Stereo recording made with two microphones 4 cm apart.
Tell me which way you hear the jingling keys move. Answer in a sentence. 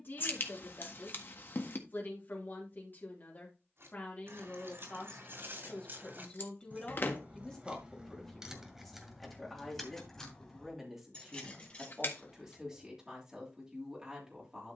In this clip you hear the jingling keys go from the right side to the left.